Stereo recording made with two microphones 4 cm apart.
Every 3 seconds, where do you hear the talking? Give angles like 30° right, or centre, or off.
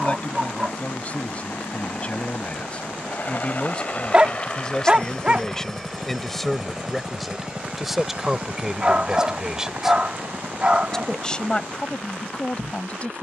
30° left, 20° left, centre, centre, 30° left.